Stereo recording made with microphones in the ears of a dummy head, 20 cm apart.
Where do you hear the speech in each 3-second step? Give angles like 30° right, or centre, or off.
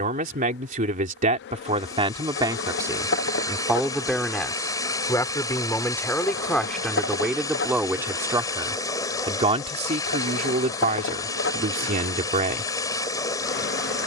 30° right, 10° left, centre, 40° right, 40° right.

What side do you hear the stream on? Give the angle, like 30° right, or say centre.
20° left.